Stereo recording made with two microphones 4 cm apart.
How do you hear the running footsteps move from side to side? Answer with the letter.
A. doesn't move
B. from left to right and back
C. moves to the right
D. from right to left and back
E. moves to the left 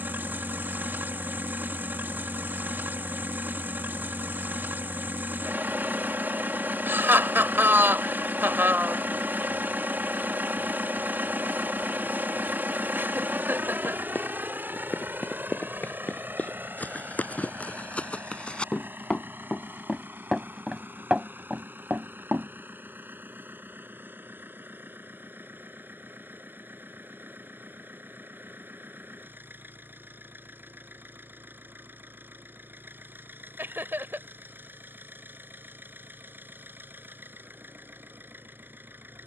C.